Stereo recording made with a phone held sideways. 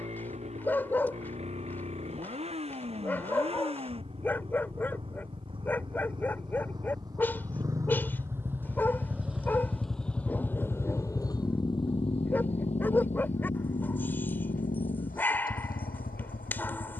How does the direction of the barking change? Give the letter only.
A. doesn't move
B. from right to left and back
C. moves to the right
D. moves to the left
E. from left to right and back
A.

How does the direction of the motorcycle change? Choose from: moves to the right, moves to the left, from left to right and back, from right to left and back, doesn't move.
moves to the left.